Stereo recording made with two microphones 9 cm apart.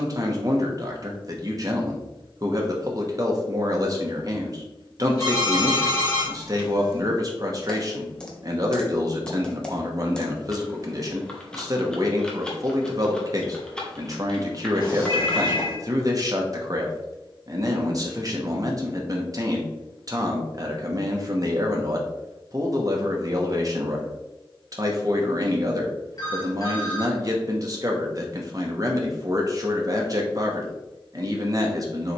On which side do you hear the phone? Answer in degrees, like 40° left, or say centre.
40° left.